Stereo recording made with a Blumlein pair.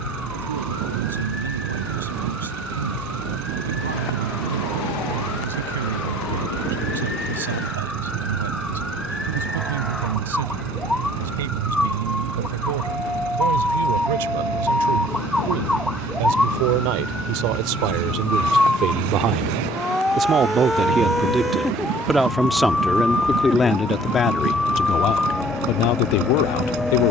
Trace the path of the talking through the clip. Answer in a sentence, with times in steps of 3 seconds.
You can hear the talking on the right from 0 s, in the centre from 21 s and on the left from 24 s.